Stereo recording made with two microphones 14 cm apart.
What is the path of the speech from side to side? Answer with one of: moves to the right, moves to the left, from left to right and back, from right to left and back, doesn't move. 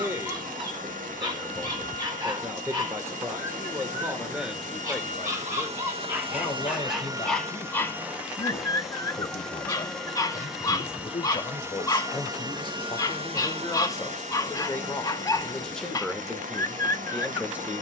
from right to left and back.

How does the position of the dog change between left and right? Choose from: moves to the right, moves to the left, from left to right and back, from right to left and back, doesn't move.
moves to the left.